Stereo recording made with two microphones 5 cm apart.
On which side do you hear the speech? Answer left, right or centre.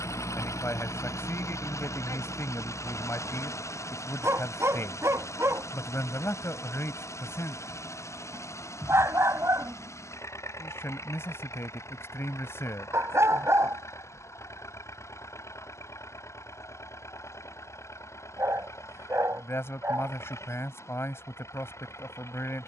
left.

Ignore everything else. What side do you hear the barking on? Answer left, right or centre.
right.